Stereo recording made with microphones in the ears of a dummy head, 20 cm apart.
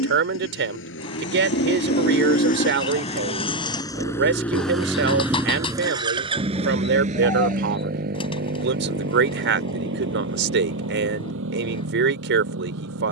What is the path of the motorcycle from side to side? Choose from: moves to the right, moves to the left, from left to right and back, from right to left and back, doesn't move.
moves to the right.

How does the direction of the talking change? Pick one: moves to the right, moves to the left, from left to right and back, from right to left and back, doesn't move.
doesn't move.